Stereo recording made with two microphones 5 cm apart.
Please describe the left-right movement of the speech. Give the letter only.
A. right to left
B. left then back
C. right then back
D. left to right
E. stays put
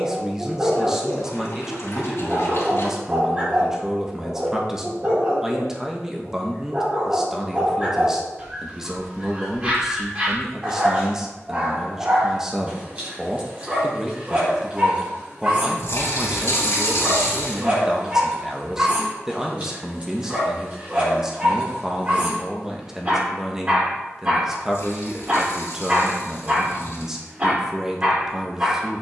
E.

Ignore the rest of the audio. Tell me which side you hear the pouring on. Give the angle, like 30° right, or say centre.
60° left.